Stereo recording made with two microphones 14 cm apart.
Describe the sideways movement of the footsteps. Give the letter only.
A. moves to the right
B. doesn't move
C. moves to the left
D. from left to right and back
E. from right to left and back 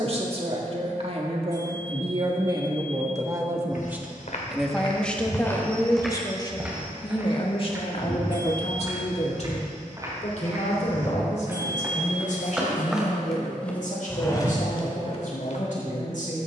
D.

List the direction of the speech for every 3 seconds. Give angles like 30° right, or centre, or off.
40° right, centre, 40° left, 60° left, 70° left, 70° left.